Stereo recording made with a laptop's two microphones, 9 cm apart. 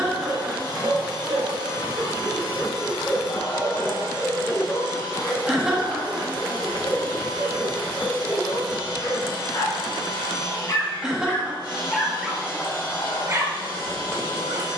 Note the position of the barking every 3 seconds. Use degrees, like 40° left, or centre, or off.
40° right, 20° left, 50° left, 40° left, 30° right.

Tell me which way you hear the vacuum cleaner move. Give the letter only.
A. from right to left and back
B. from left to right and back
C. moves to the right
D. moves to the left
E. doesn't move
E.